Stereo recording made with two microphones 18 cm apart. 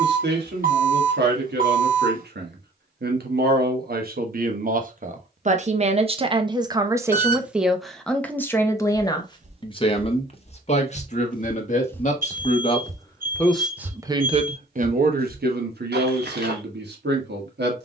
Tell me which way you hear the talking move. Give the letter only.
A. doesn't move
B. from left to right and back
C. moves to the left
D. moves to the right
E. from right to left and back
E.